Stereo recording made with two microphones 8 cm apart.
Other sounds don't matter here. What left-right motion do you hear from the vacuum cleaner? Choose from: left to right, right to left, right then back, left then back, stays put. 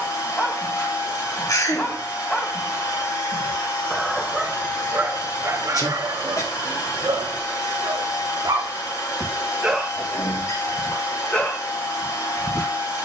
stays put.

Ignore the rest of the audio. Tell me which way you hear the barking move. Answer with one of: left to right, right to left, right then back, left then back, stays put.
right then back.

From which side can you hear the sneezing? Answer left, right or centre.
left.